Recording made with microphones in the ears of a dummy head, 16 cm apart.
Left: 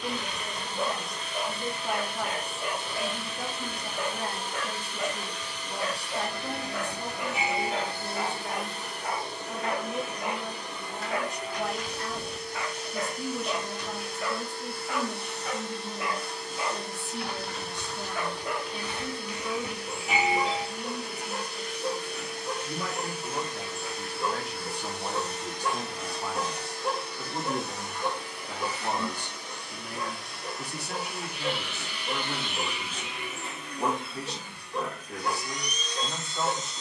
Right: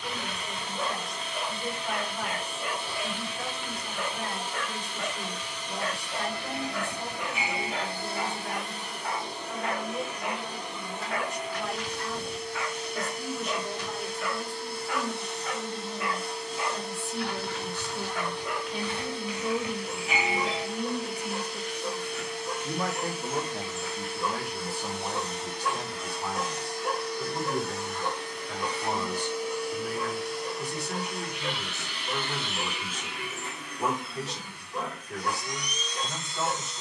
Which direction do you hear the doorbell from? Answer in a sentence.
In this clip you hear the doorbell in the centre.